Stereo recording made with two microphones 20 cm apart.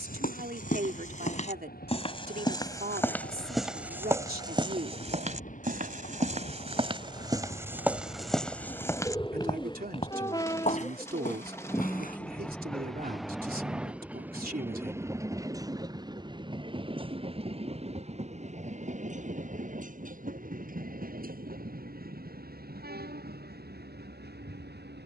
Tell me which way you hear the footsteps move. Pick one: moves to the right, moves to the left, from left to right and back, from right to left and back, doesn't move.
from left to right and back.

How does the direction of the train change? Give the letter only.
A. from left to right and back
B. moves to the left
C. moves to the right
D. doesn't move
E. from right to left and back
C.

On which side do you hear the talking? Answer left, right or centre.
right.